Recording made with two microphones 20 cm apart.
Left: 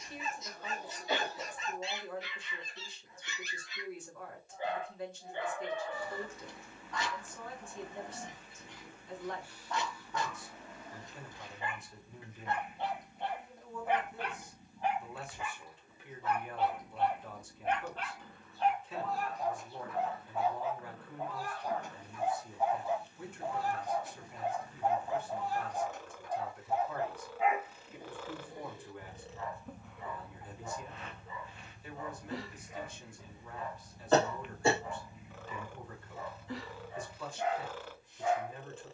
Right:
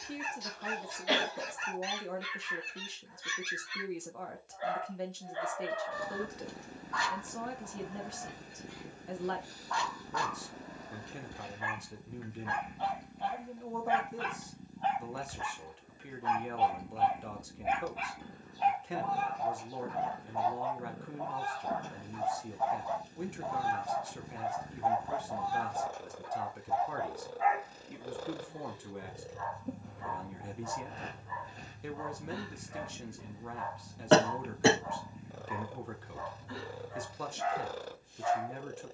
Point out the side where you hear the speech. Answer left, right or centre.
right.